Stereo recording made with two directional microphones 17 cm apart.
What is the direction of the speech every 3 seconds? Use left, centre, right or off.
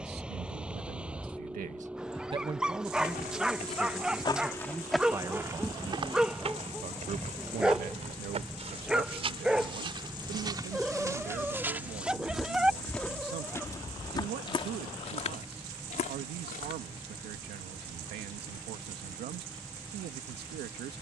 right, centre, right, right, right, right, right.